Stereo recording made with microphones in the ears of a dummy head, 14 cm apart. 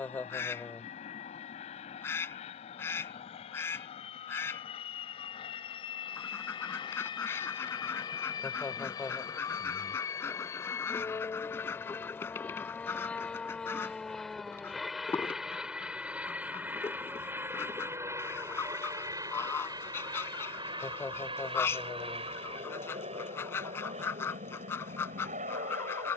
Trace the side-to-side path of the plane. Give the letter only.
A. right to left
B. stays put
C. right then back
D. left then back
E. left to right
E.